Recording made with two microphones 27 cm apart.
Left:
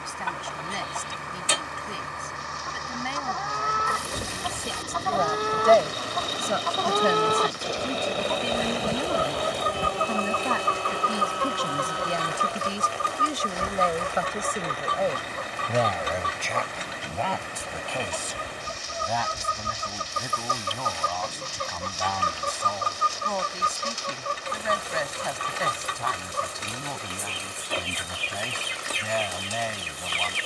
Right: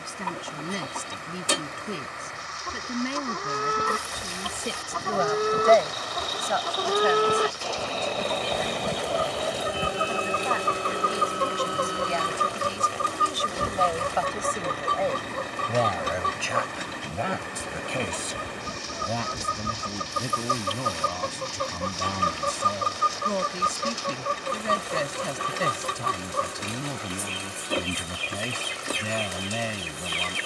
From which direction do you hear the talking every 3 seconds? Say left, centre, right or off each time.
right, right, left, left, left, centre, right, right, right, right.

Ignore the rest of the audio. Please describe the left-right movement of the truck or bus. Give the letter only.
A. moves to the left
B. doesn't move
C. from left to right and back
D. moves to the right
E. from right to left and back
D.